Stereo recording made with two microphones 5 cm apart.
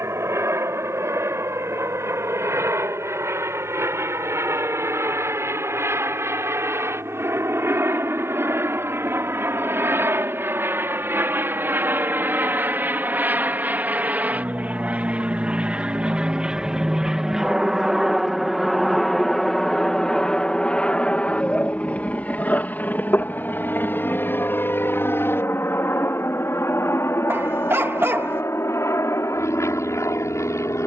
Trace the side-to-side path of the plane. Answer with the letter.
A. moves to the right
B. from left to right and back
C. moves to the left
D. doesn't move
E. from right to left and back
C.